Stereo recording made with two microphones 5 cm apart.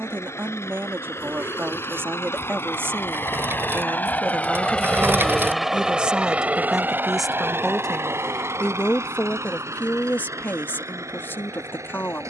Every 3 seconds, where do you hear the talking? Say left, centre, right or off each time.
right, right, centre, left.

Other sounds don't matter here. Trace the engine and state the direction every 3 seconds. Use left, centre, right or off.
left, left, right, right.